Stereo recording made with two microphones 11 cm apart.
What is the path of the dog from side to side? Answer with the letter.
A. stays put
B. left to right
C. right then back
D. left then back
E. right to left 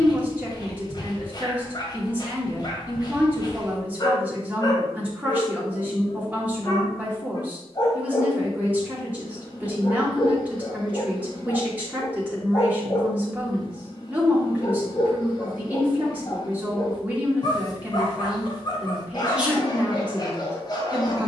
A.